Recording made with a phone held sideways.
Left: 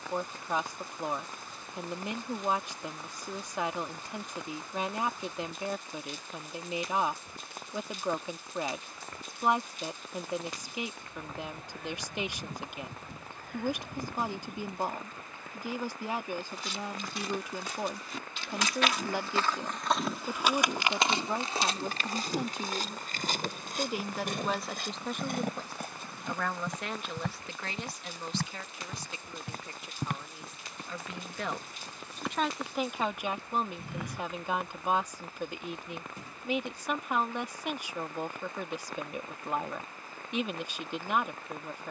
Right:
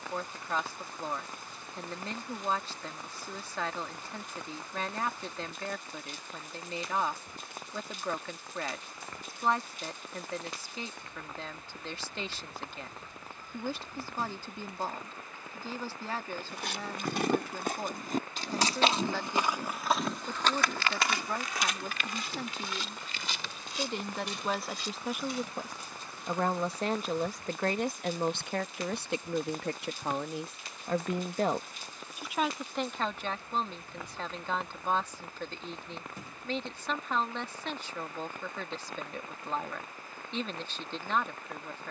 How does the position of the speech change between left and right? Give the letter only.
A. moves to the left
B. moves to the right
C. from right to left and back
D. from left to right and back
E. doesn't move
D.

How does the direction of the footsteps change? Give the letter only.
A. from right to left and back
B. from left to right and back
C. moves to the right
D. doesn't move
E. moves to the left
E.